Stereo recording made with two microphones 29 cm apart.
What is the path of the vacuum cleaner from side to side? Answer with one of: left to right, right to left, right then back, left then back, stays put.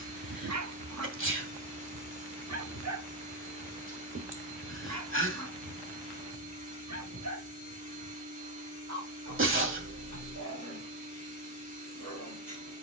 stays put.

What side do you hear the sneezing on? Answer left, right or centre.
right.